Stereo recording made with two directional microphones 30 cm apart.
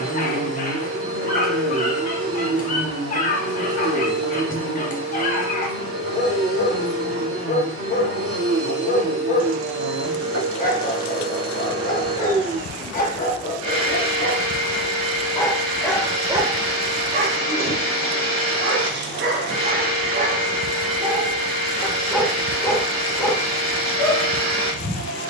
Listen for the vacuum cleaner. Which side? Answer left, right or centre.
right.